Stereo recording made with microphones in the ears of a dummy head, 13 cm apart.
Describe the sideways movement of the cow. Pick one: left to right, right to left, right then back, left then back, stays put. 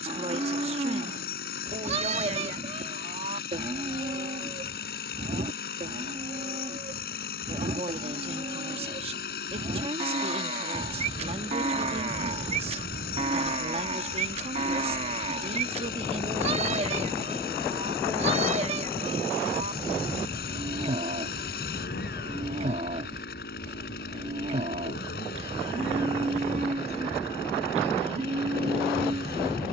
stays put.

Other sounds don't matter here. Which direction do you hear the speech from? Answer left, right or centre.
right.